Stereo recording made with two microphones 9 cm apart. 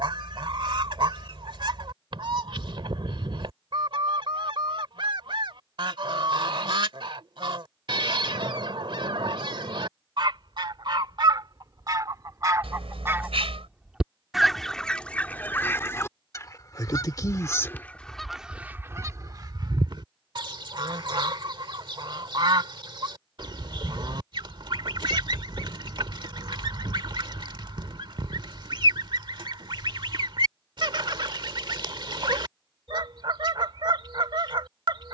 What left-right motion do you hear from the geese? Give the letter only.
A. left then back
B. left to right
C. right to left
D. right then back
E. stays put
A.